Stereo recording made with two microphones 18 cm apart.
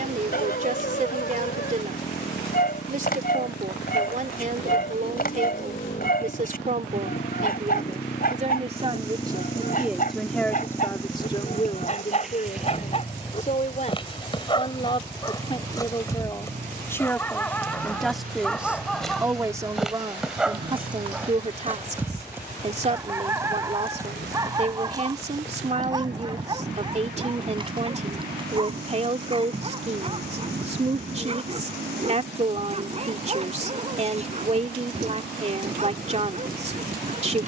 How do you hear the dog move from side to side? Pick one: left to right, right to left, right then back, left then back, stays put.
left to right.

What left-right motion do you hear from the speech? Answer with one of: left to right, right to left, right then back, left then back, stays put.
left then back.